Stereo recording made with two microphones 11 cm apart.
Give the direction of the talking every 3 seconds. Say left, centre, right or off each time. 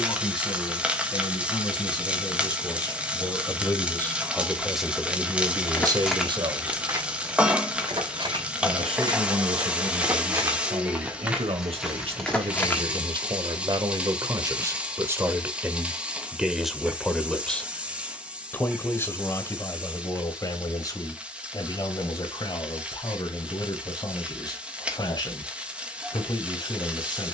left, centre, right, right, right, centre, left, left, left.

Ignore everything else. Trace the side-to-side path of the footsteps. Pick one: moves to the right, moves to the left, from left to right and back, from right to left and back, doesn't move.
from left to right and back.